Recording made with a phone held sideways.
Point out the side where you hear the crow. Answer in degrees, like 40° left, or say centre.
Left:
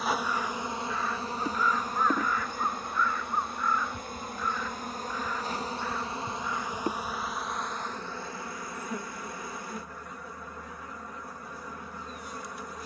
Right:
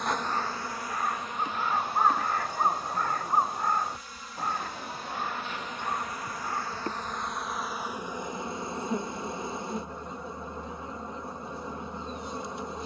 50° right.